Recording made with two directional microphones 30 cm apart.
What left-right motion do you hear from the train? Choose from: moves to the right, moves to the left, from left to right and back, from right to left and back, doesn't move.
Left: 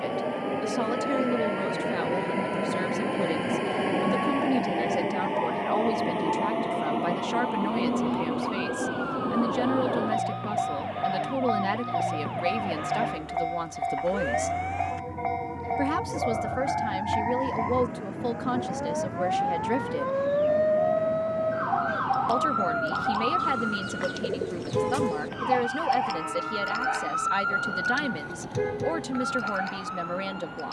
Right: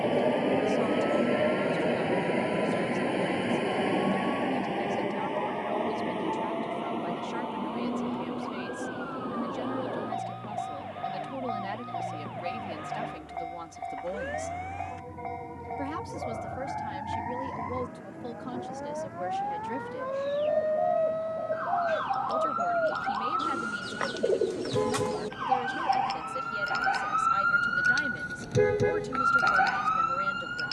moves to the left.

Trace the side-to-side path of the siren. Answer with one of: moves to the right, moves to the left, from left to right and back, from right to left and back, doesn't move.
moves to the right.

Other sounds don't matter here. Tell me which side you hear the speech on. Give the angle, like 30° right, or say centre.
60° left.